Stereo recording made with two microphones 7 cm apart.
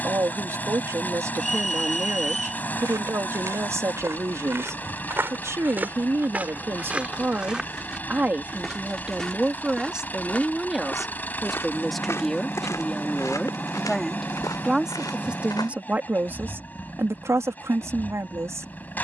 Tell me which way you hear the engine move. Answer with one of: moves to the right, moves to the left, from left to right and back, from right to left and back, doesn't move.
doesn't move.